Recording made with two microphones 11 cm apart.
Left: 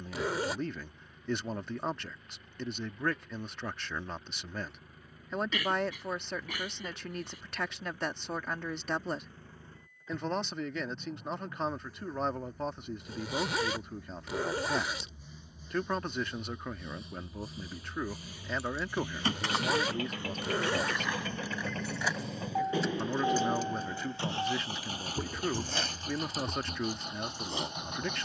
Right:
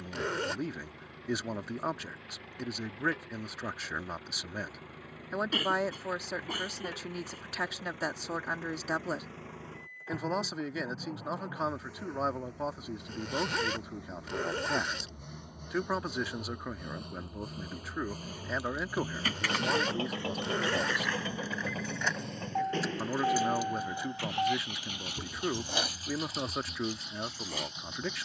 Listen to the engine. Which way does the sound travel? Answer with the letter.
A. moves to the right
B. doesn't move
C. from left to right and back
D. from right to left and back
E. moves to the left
E.